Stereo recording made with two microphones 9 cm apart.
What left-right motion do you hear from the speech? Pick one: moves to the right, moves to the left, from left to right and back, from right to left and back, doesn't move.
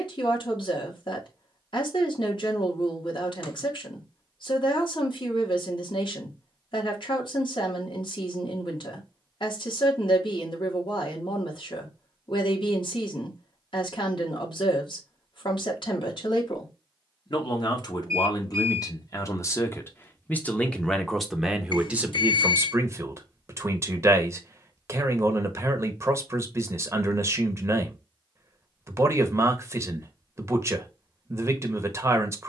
moves to the right.